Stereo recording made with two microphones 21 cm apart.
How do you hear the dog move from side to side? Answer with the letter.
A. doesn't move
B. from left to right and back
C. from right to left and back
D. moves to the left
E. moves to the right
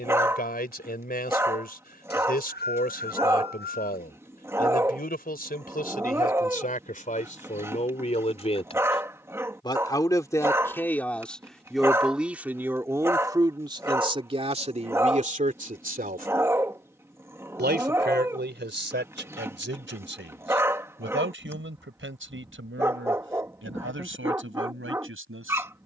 A.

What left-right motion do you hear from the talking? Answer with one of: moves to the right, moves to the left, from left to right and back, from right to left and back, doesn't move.
moves to the right.